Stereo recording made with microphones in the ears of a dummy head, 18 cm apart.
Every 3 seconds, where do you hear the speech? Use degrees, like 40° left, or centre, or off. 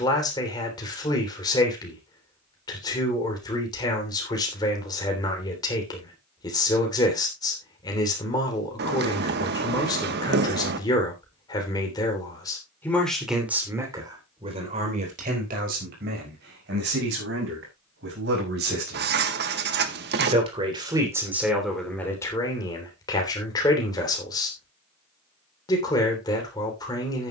20° left, 20° left, 20° left, 20° left, 10° right, 50° right, 40° right, 10° left, 20° left.